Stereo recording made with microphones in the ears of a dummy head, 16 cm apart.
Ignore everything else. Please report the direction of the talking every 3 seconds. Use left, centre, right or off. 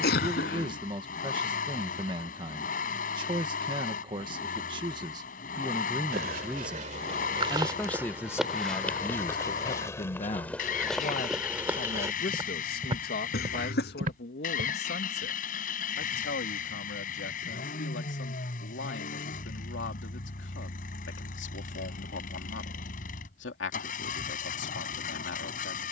right, right, centre, left, left, left, left, left, left.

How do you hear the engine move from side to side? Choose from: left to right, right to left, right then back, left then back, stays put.
stays put.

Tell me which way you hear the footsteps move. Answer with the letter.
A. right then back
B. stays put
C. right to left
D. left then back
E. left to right
D.